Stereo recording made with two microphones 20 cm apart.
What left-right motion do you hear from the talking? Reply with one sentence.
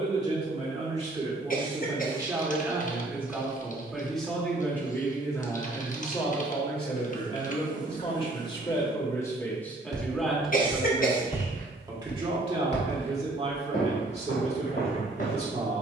In this clip you hear the talking go left and come back.